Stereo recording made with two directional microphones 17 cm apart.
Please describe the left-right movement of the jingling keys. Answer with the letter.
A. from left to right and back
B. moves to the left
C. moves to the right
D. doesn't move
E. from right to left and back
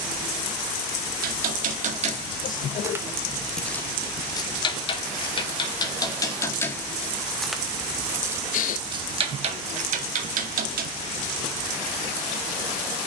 E.